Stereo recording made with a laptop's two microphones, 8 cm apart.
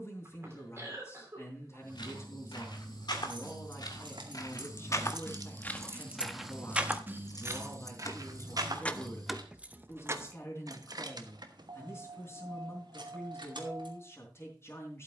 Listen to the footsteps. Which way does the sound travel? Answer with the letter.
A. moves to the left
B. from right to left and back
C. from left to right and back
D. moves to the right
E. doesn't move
D.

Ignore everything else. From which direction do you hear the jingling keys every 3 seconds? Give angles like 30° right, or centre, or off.
off, 60° right, 30° left, 40° right, 70° right.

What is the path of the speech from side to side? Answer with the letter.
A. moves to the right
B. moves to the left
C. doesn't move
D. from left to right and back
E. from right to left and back
C.